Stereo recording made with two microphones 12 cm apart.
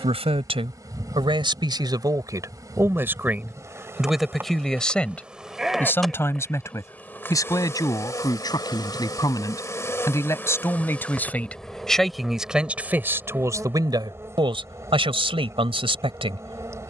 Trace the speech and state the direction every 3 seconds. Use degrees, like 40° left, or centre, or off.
40° right, centre, 30° left, 20° left, 20° right, 50° right.